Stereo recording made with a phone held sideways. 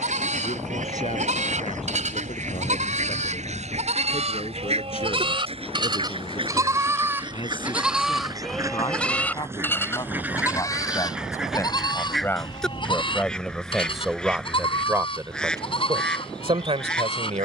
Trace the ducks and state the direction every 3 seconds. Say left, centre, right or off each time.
right, right, right, centre, centre, centre.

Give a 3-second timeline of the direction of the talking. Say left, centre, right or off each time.
left, left, left, left, centre, right.